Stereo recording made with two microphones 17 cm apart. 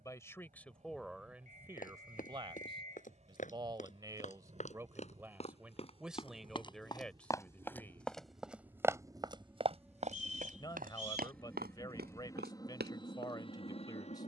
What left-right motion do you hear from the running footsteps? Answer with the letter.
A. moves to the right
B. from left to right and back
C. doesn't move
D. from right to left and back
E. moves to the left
A.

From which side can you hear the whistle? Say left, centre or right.
right.